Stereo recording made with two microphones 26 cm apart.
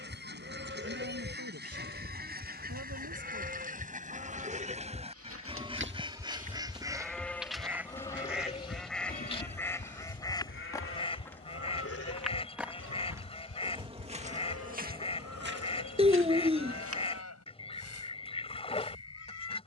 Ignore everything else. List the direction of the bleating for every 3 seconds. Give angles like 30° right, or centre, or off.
50° right, 30° right, 10° left, 50° left, 70° left, 80° left, 80° left.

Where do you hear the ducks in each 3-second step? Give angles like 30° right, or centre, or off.
40° right, 30° right, 10° right, 20° left, 20° left, 20° left, 20° left.